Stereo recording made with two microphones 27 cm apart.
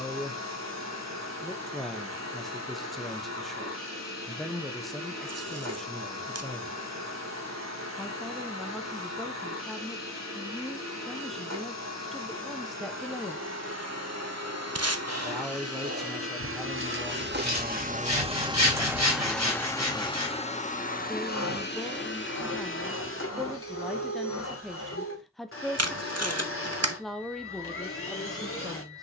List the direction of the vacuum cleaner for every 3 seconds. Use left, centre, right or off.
right, right, right, right, right, right, centre, left, left, left.